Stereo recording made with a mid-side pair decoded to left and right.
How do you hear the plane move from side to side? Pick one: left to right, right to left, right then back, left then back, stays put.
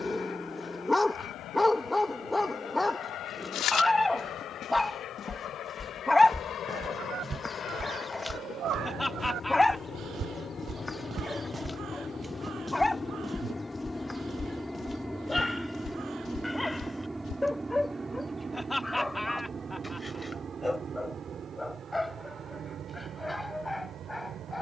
left to right.